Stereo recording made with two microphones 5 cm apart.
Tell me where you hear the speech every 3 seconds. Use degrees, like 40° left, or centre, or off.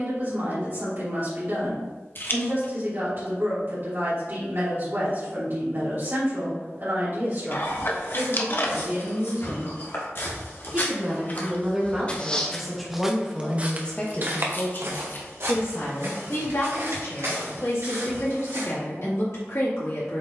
50° right, 50° right, 50° right, 30° right, 20° left, 70° left, 80° left.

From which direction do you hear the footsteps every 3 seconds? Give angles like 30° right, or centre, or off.
off, off, 70° left, 50° left, 20° right, 70° right, 80° right.